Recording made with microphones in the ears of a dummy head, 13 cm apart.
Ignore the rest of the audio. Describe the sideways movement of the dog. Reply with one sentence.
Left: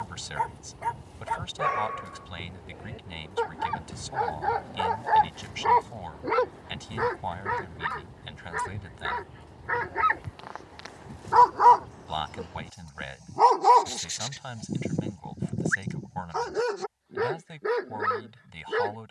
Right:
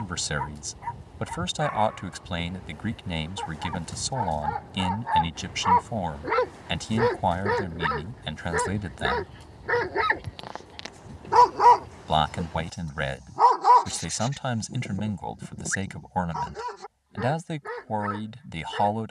You can hear the dog move from left to right and back again.